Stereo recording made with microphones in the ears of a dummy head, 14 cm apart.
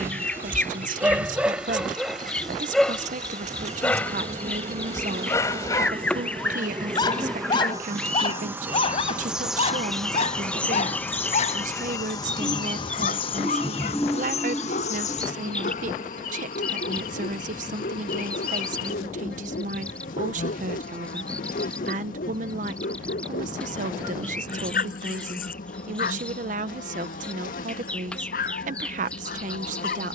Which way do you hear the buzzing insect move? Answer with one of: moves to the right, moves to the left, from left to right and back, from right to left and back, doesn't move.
moves to the left.